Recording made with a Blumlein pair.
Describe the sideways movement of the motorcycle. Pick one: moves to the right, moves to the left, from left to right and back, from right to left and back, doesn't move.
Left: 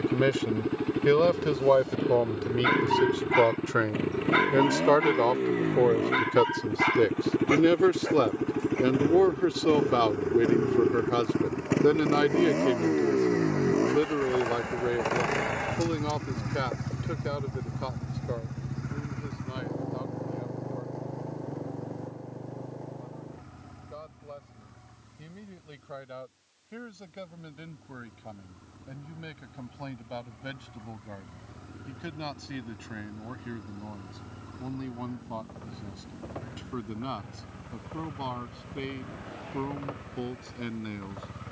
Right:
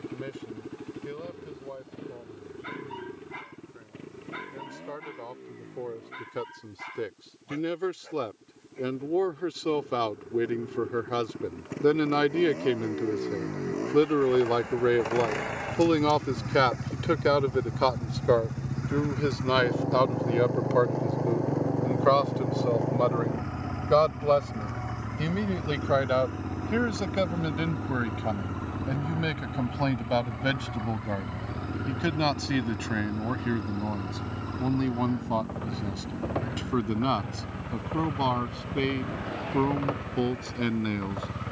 moves to the right.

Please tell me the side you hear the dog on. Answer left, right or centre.
left.